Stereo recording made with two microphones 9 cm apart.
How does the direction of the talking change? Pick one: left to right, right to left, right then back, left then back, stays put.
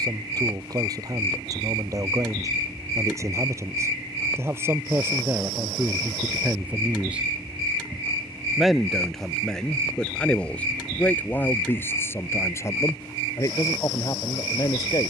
right to left.